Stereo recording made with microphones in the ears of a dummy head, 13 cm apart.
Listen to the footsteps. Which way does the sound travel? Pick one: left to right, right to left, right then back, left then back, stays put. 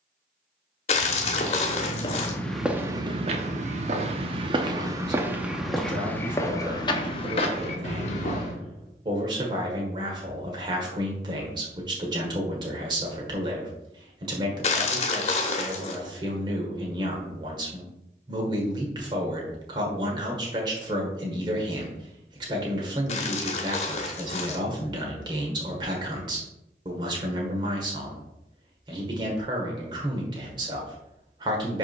right then back.